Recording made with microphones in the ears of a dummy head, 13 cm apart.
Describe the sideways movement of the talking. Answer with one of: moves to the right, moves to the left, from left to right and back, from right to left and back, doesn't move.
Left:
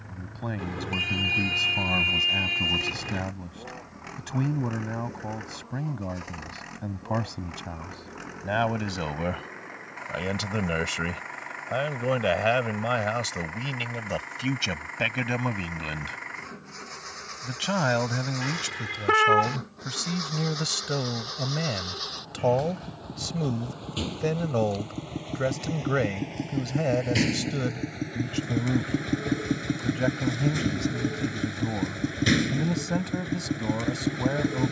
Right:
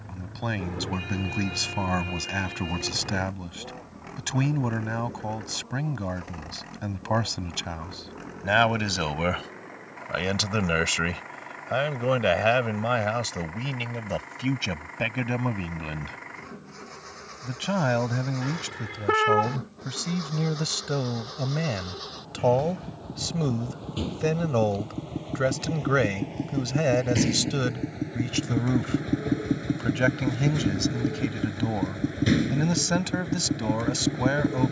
from right to left and back.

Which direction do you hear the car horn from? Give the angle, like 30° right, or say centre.
50° left.